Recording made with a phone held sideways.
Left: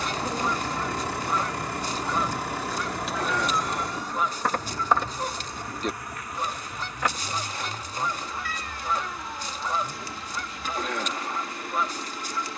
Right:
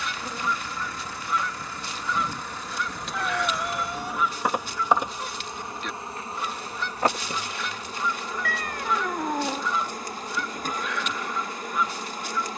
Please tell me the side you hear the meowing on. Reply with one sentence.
In this clip you hear the meowing on the right.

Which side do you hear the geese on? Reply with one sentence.
You can hear the geese on the left.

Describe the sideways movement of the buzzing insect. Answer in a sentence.
In this clip you hear the buzzing insect move to the right.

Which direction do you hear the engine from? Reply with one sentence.
In this clip you hear the engine on the left.